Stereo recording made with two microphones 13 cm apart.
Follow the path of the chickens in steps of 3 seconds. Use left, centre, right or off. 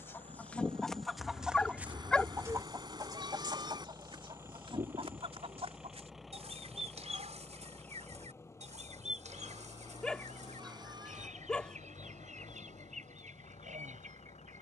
centre, right, right, right, right.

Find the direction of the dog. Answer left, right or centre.
centre.